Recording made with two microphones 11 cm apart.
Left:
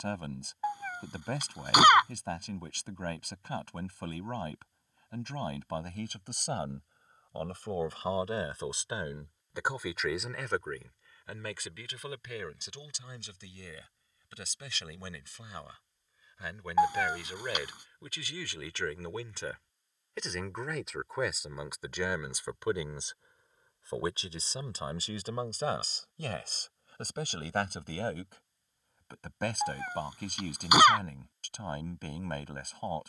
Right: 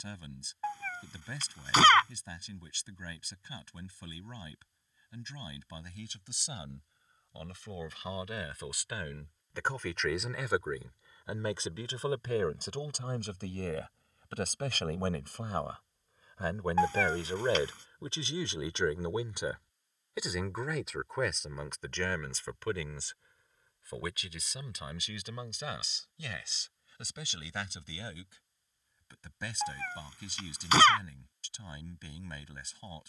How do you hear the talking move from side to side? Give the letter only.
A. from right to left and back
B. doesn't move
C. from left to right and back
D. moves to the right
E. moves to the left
C.